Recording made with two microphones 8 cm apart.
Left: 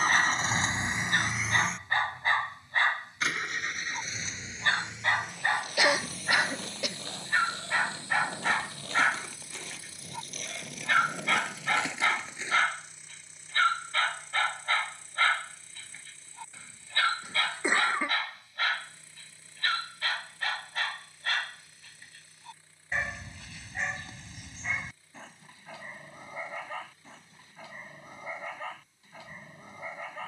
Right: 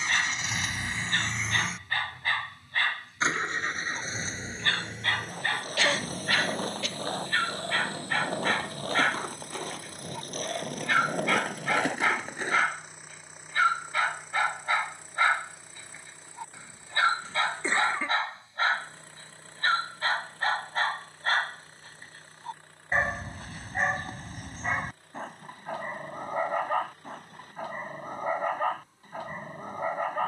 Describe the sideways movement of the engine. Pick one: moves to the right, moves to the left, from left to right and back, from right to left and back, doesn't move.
moves to the right.